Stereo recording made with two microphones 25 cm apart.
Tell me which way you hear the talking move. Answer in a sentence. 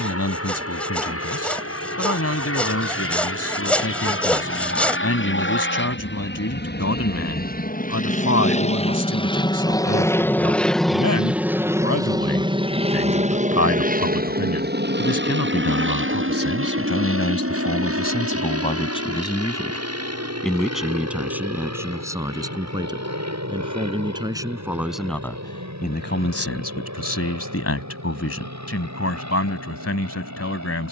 You can hear the talking go right and come back.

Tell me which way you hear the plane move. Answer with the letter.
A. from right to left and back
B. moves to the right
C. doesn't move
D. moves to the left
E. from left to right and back
B.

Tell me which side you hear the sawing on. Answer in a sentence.
In this clip you hear the sawing in the centre.